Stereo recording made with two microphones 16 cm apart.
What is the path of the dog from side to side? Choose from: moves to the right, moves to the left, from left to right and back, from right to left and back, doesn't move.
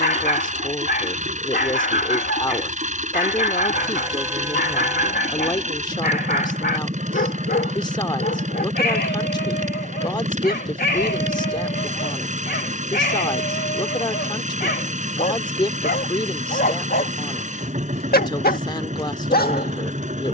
doesn't move.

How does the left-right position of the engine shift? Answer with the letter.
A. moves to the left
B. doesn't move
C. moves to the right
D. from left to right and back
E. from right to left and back
B.